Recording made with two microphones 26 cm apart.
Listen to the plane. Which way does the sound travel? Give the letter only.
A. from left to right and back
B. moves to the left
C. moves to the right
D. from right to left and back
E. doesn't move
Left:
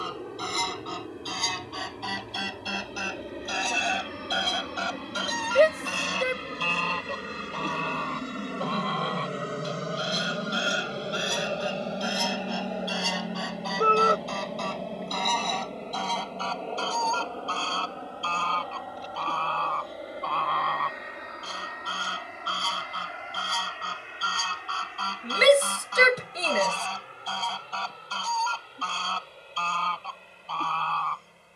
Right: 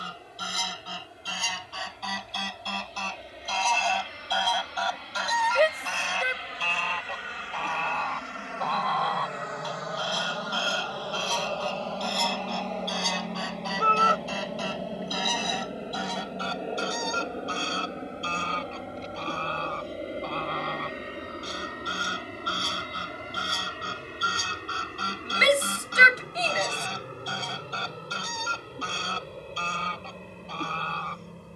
C.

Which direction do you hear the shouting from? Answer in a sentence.
In this clip you hear the shouting on the left.